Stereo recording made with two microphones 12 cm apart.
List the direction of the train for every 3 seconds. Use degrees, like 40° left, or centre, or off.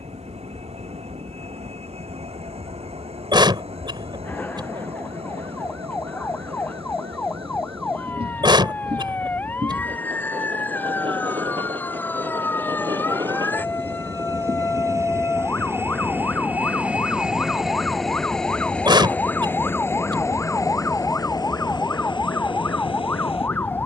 60° right, 60° right, 50° right, 50° right, 40° right, 10° right, 20° left, 40° left.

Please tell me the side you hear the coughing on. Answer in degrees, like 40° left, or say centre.
40° right.